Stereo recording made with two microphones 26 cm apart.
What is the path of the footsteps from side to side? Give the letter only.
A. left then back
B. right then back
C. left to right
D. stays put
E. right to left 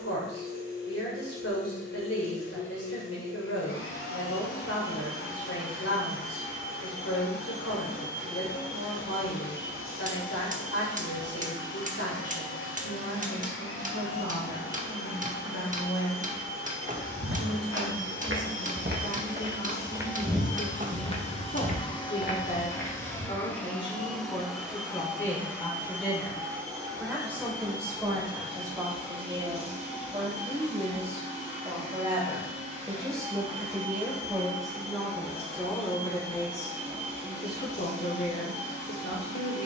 E.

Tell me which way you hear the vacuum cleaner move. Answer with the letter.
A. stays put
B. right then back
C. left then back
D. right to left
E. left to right
E.